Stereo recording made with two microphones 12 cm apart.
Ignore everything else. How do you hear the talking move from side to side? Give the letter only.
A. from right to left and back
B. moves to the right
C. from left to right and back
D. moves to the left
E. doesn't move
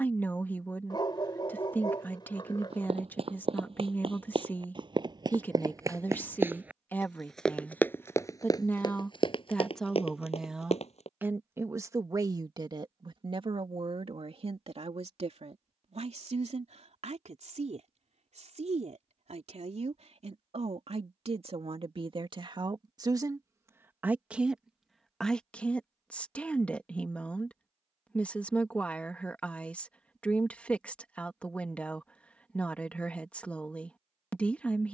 C.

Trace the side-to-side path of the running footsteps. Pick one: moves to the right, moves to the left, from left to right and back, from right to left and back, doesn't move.
moves to the left.